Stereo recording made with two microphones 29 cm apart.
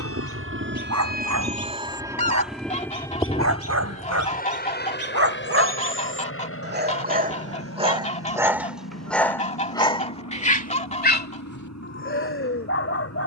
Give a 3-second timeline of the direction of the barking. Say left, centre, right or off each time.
right, right, right, left, left.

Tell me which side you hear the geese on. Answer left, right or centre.
left.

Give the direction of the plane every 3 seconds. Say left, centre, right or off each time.
right, left, left, left, left.